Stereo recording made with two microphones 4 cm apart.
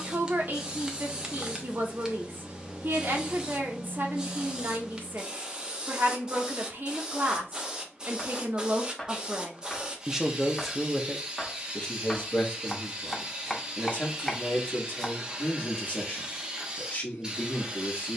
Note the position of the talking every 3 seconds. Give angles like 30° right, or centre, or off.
50° right, 50° right, 50° right, centre, 30° left, 30° left.